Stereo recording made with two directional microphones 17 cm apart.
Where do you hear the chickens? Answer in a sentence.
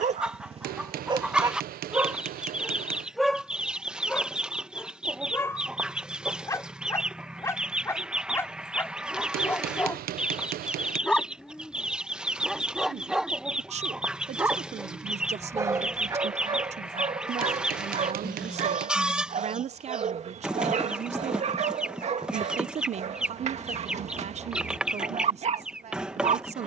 You can hear the chickens in the centre.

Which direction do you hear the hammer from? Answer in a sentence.
In this clip you hear the hammer on the right.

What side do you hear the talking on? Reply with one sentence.
You can hear the talking on the right.